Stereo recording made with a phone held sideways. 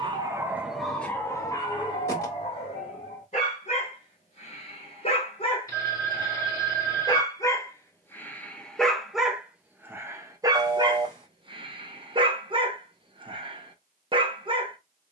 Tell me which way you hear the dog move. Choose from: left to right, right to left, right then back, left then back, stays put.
left then back.